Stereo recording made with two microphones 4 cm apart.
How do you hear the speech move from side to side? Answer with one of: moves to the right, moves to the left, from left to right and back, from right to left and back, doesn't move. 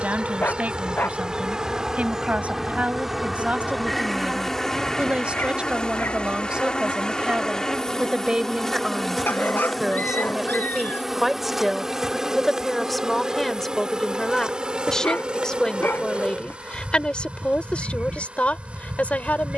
moves to the left.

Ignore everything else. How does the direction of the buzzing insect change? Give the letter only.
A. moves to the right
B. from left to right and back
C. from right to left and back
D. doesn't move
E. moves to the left
C.